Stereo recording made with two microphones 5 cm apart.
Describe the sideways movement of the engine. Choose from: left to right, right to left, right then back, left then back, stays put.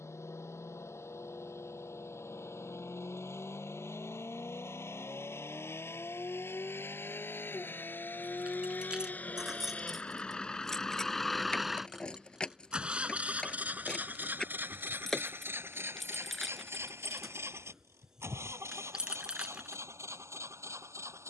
left to right.